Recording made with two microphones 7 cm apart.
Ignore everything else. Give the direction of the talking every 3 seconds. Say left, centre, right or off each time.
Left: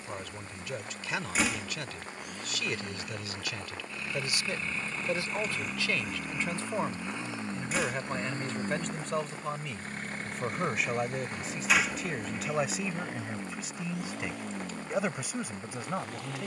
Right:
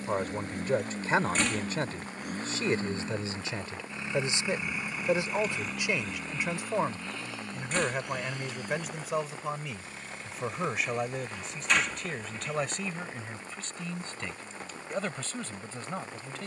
right, right, centre, centre, centre, centre.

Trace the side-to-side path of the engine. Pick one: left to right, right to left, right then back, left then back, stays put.
right to left.